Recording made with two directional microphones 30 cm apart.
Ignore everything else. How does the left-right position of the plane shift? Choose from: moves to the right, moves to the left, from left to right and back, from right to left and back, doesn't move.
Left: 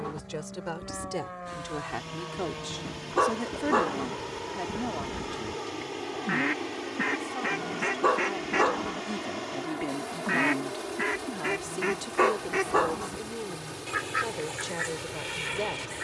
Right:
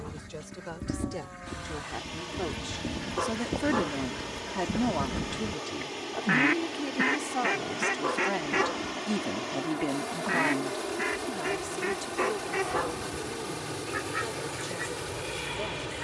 moves to the right.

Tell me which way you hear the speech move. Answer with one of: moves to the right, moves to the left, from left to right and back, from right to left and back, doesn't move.
from left to right and back.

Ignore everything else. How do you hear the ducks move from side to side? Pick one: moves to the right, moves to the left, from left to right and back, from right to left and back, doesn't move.
moves to the left.